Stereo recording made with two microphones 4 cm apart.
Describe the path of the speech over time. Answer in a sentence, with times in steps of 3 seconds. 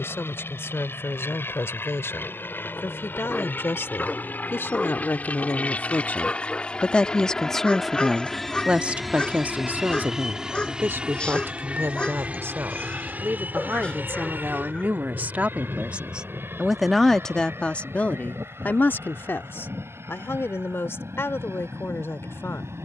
You can hear the speech on the left from 0 s, in the centre from 6 s, on the right from 9 s, in the centre from 15 s and on the left from 18 s.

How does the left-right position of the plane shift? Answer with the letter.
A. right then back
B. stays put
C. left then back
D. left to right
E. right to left
D.